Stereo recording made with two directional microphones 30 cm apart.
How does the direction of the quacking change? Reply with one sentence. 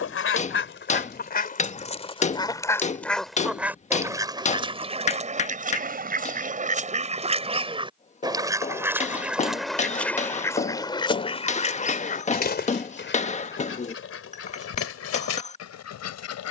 In this clip you hear the quacking go right and come back.